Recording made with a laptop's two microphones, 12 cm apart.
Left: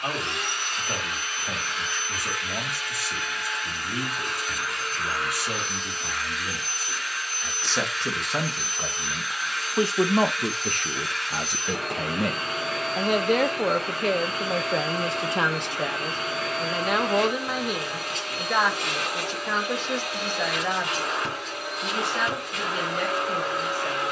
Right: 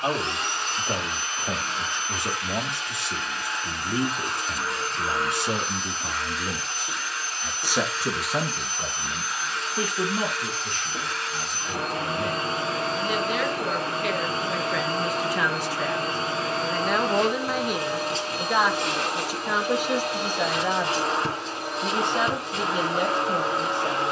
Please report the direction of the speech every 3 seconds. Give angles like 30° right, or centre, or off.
20° right, 20° right, 10° right, 50° left, 50° left, 10° left, 10° right, 20° right.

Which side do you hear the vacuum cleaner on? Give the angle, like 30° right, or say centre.
30° right.